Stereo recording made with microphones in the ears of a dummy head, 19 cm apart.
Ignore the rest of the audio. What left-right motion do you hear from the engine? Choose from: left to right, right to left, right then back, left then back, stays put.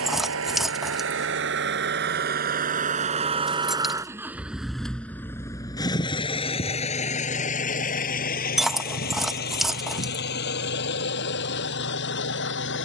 right to left.